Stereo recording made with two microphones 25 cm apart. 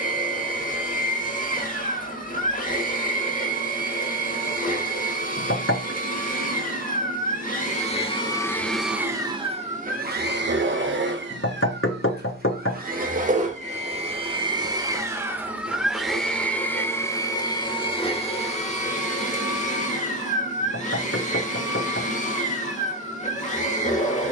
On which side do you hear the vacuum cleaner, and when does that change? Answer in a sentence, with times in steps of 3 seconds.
In this clip you hear the vacuum cleaner on the left from 0 s, on the right from 9 s, in the centre from 15 s and on the left from 18 s.